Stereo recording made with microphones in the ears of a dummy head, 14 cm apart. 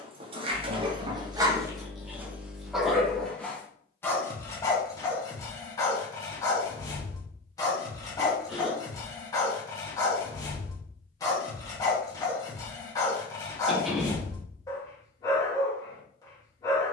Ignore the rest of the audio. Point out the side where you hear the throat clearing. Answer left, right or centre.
centre.